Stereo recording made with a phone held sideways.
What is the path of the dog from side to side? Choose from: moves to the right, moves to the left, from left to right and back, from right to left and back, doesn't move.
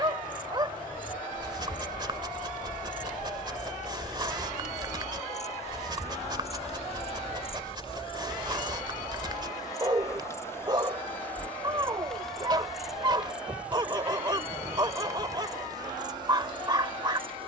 doesn't move.